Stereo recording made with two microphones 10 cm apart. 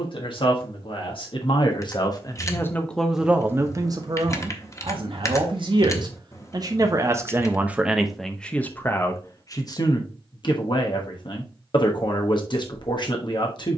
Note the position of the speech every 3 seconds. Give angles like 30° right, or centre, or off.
50° left, 40° right, 10° right, 50° left, 50° left.